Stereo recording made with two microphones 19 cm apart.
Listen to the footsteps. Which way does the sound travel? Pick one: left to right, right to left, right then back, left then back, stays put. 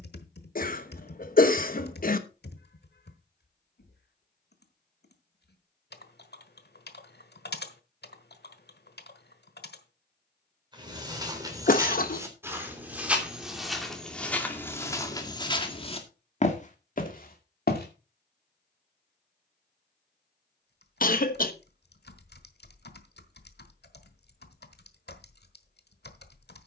right to left.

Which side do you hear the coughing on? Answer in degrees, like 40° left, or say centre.
50° left.